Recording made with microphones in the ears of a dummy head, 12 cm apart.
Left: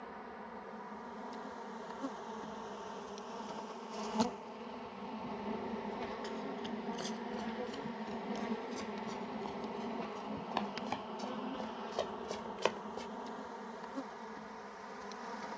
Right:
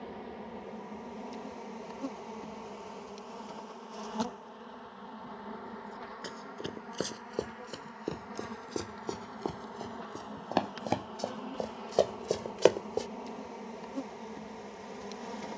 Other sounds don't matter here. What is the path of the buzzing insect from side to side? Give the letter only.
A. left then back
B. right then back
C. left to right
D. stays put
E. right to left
A.